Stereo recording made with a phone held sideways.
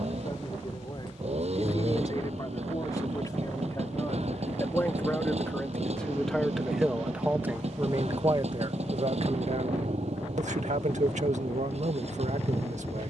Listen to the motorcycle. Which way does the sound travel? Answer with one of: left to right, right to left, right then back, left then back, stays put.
stays put.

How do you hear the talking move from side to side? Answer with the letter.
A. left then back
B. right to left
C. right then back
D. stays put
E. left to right
E.